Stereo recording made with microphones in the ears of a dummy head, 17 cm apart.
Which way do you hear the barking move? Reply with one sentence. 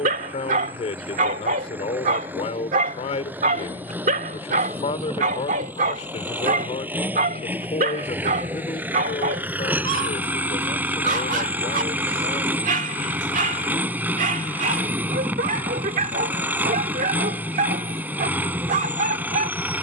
You can hear the barking stay put.